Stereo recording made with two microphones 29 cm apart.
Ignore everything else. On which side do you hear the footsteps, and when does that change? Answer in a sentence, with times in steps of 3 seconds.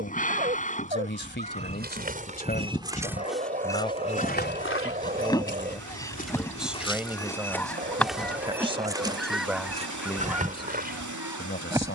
In this clip you hear the footsteps on the right from 0 s, on the left from 3 s, in the centre from 6 s and on the right from 9 s.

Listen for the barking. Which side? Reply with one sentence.
In this clip you hear the barking on the right.